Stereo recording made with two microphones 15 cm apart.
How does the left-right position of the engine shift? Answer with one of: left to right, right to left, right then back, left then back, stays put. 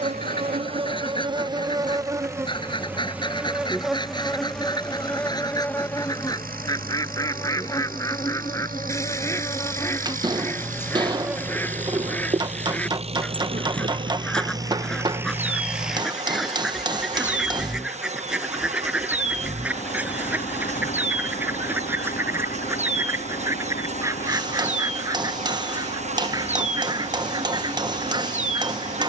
right to left.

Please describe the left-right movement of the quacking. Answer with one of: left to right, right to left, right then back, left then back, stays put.
left to right.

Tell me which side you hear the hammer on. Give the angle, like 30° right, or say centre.
30° right.